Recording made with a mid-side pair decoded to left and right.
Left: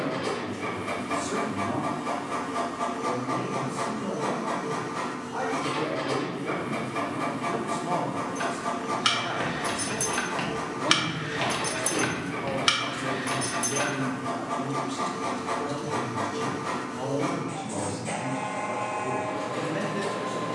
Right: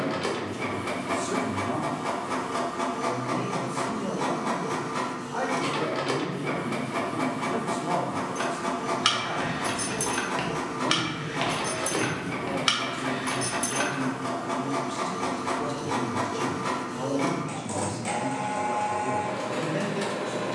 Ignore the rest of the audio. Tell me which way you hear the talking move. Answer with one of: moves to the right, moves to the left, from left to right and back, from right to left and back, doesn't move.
from right to left and back.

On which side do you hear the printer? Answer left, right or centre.
right.